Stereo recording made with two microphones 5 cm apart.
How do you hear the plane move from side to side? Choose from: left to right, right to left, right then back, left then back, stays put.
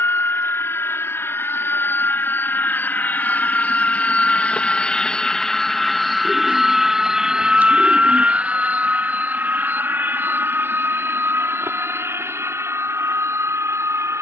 left to right.